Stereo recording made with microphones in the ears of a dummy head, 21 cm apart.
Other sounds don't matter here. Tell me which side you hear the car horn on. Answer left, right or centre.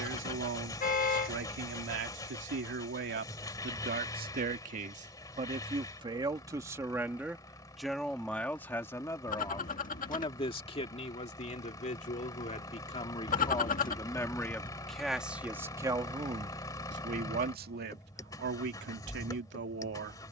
left.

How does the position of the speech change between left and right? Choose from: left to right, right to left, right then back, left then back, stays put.
left then back.